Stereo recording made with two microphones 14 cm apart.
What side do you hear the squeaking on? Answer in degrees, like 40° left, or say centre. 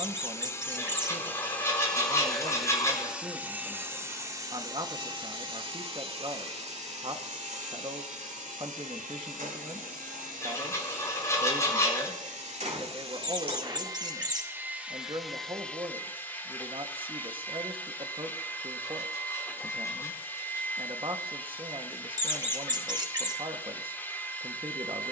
30° right.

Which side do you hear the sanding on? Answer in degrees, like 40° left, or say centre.
20° left.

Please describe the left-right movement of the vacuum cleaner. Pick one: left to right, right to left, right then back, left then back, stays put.
right then back.